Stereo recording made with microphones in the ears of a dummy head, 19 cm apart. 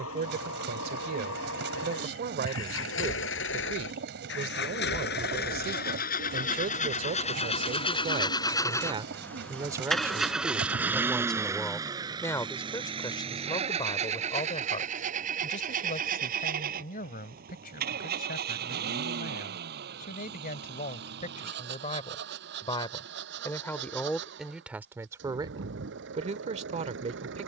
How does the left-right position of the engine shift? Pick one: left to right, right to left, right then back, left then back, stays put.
left to right.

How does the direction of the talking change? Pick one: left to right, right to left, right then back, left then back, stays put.
left then back.